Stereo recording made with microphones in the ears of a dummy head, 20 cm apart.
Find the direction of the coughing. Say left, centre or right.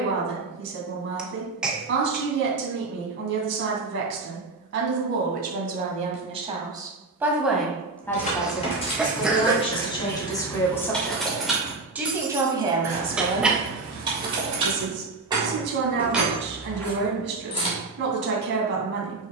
centre.